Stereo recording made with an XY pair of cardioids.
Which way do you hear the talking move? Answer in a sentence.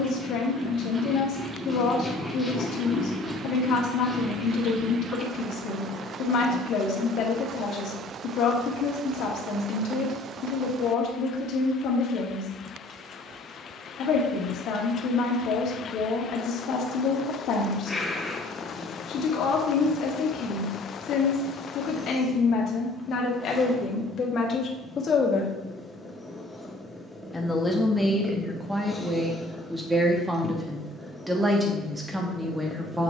In this clip you hear the talking move from left to right.